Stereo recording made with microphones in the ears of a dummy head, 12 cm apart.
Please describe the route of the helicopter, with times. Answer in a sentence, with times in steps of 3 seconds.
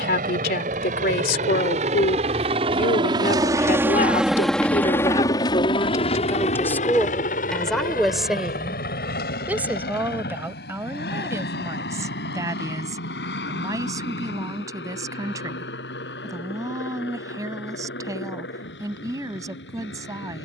You can hear the helicopter on the right from 0 s, in the centre from 3 s and on the left from 6 s.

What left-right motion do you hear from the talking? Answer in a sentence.
In this clip you hear the talking move from left to right.